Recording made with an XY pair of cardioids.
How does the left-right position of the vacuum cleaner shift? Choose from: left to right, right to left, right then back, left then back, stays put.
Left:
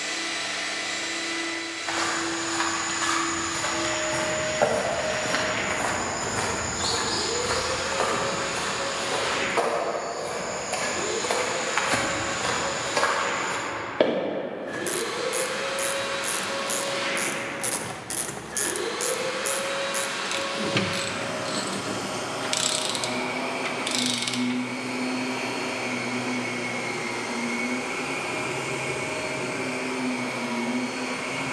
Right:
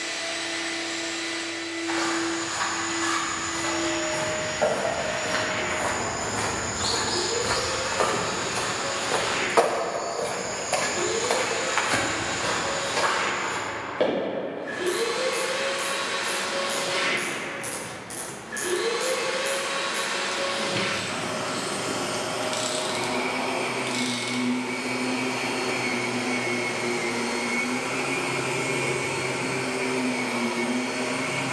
left to right.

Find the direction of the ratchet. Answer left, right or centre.
left.